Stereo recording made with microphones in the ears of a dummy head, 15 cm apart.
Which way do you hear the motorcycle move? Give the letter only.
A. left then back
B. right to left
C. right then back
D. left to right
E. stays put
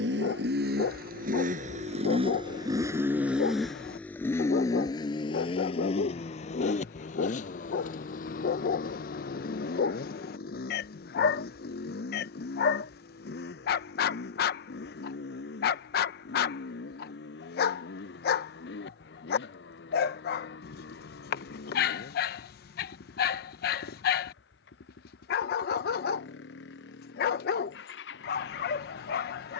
B.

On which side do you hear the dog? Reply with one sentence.
In this clip you hear the dog on the left.